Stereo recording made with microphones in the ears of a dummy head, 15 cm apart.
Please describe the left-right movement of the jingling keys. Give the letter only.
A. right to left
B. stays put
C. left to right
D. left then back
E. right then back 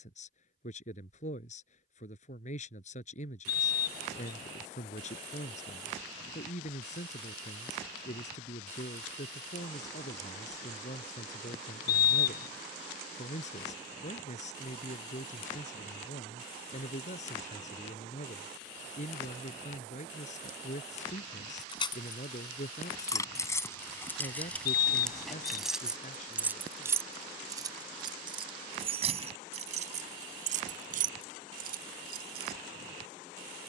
C.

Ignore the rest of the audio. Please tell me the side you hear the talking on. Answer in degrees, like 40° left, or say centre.
50° left.